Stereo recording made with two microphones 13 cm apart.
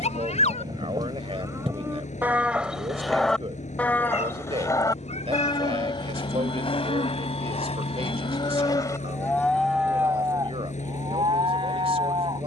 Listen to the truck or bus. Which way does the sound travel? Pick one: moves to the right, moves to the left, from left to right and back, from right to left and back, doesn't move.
doesn't move.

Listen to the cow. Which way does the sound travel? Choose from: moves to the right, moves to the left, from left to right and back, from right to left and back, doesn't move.
from right to left and back.